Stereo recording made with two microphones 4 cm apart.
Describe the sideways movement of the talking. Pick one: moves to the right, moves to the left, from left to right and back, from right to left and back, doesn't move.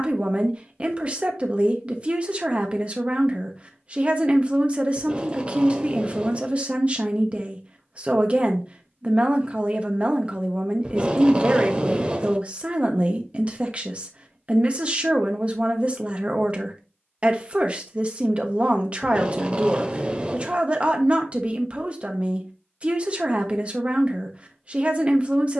doesn't move.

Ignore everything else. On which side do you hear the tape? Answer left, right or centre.
right.